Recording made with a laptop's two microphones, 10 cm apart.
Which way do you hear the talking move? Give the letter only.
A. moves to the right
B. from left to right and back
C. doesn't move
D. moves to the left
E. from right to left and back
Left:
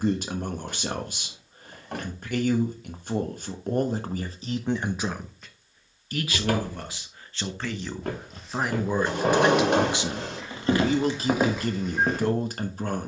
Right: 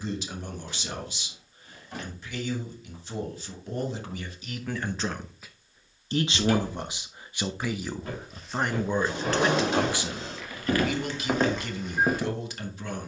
B.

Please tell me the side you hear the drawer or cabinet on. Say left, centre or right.
left.